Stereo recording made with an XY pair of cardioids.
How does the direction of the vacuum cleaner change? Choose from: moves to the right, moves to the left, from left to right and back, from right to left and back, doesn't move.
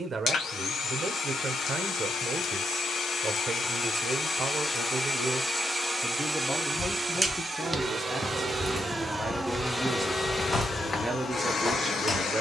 from left to right and back.